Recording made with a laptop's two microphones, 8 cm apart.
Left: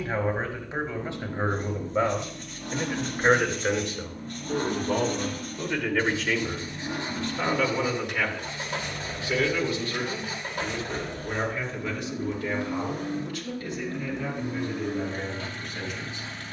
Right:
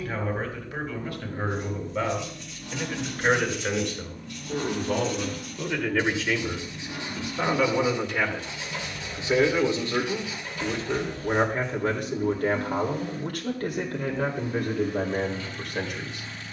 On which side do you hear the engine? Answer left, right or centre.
left.